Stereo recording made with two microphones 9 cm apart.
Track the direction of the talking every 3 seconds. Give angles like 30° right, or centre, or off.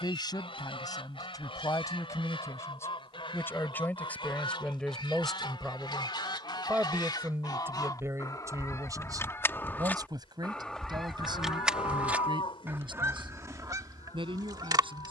40° left, 10° left, 30° right, 50° right, 60° right.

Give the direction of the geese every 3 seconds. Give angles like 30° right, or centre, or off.
70° left, 60° left, 40° left, 10° left, 40° right.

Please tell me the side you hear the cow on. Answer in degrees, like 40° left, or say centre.
70° left.